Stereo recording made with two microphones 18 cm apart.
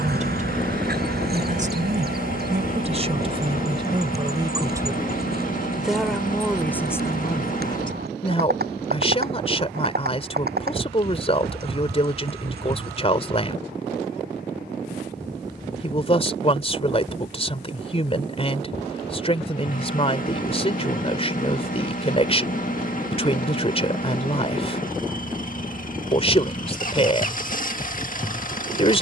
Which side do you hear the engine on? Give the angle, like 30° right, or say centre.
50° left.